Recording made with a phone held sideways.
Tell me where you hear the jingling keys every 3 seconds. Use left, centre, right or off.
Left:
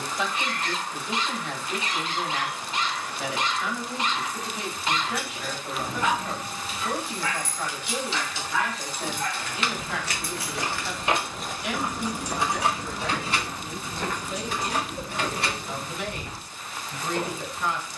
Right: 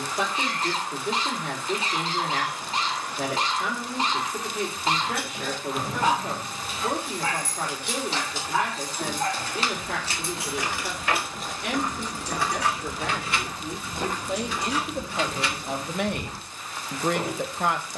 off, right, right, right, left, left.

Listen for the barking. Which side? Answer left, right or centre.
right.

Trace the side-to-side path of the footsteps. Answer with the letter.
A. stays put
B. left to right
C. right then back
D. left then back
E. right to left
B.